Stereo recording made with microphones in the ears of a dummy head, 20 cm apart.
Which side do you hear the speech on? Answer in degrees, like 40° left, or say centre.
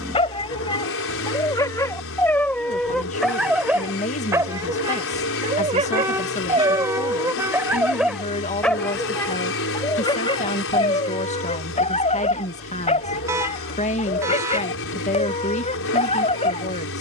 30° left.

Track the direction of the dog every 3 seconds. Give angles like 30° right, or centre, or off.
20° left, 20° right, 10° right, 20° left, 30° left, 30° left.